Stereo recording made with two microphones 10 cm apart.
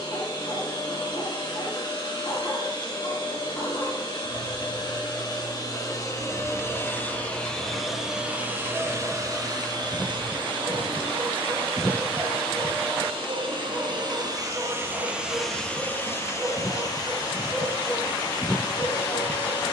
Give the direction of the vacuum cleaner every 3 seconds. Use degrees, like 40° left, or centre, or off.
50° left, 50° left, 10° left, 50° right, 50° right, 30° left, 50° left.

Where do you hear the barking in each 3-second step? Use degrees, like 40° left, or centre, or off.
50° left, 50° left, 30° left, centre, 20° right, 20° right, 40° left.